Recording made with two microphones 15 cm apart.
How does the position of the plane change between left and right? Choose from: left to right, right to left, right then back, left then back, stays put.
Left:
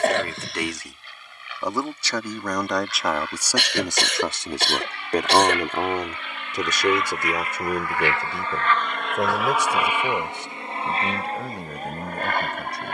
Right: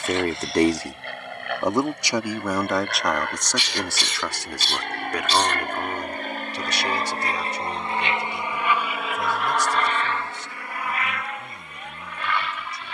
right to left.